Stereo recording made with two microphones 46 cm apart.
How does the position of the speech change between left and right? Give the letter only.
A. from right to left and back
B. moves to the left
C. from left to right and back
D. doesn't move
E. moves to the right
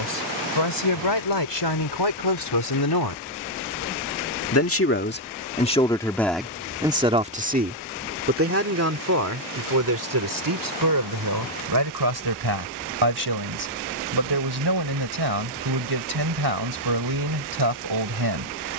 E.